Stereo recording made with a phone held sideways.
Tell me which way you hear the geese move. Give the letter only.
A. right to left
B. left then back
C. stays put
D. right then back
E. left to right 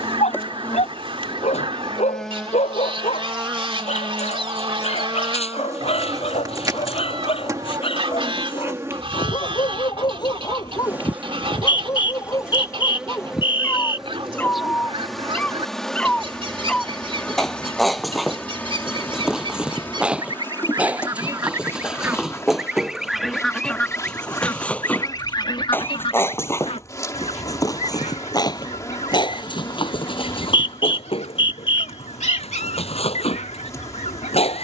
A.